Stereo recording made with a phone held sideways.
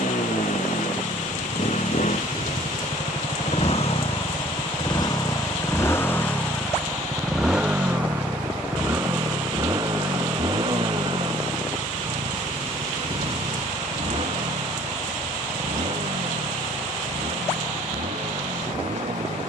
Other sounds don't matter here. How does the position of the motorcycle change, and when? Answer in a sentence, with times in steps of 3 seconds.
You can hear the motorcycle on the left from 0 s, in the centre from 6 s and on the right from 9 s.